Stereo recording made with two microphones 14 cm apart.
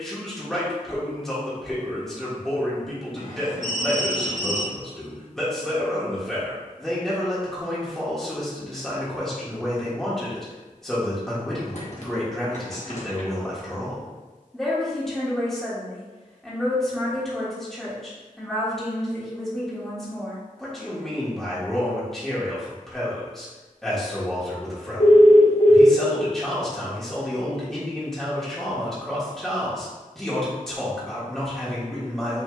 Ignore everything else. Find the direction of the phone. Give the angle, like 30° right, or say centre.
60° left.